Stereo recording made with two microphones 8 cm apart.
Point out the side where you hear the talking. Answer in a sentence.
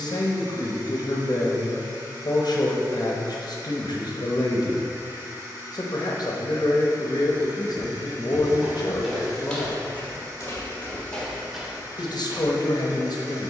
In this clip you hear the talking on the left.